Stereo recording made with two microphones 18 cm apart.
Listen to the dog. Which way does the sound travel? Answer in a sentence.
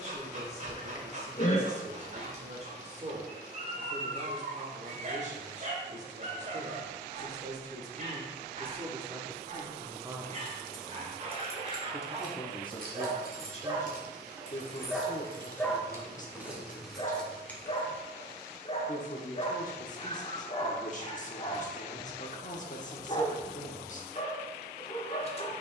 In this clip you hear the dog travel towards the left.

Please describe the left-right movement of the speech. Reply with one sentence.
In this clip you hear the speech travel towards the left.